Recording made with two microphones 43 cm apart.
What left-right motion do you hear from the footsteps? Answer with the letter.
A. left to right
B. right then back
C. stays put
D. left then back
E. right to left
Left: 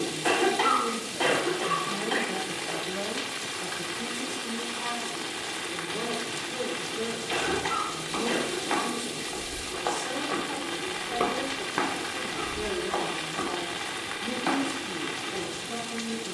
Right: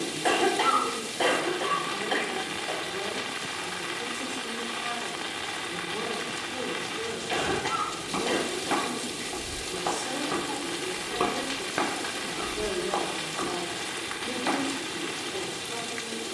E.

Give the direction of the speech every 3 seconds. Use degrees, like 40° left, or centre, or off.
60° left, 20° left, 20° right, 10° right, 20° left, 50° left.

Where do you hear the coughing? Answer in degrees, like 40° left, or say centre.
20° left.